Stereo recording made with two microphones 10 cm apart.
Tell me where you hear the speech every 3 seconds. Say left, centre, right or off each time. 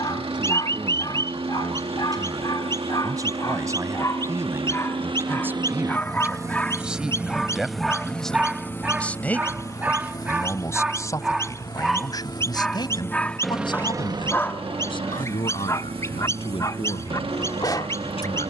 right, right, centre, left, left, left.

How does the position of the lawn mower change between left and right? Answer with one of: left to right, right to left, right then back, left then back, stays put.
left then back.